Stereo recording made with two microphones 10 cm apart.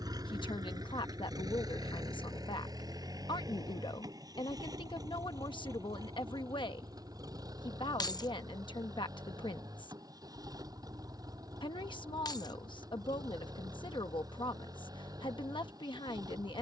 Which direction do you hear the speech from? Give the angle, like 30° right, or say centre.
60° left.